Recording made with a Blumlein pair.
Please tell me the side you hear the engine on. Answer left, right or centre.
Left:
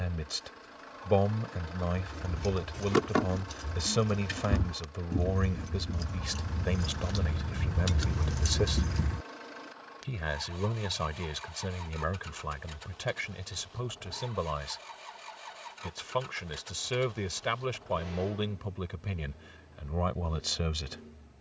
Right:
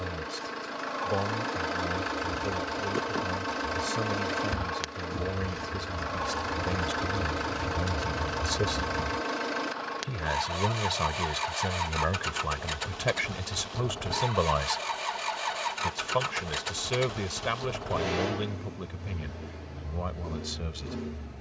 right.